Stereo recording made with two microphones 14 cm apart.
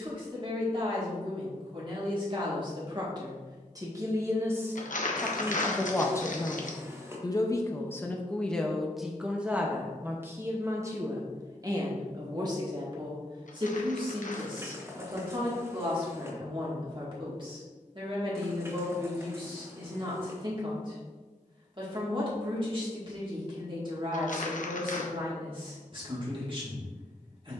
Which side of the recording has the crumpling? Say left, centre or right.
left.